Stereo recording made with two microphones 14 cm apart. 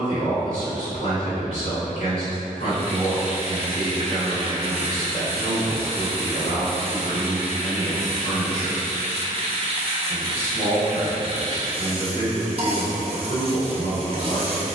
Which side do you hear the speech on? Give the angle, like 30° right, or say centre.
50° left.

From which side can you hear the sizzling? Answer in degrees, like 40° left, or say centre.
40° right.